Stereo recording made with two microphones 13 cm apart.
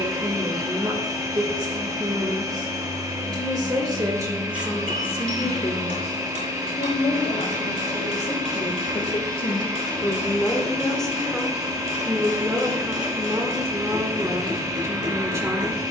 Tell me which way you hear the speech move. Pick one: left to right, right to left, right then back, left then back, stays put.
left then back.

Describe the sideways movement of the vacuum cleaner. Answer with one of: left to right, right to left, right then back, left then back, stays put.
stays put.